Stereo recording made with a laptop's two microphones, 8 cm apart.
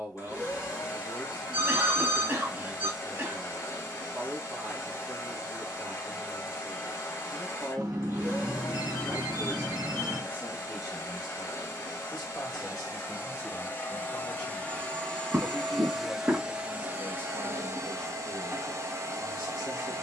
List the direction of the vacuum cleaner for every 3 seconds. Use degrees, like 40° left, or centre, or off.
40° left, 40° left, 40° left, 40° left, 30° left, 10° right, 40° right.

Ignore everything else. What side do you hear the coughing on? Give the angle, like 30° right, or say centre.
30° right.